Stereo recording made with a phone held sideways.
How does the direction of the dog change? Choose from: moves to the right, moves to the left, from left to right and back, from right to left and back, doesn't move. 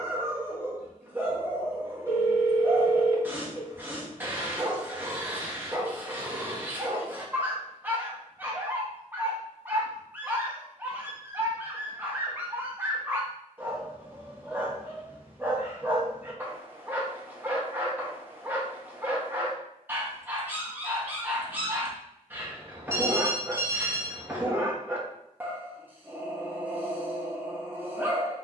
doesn't move.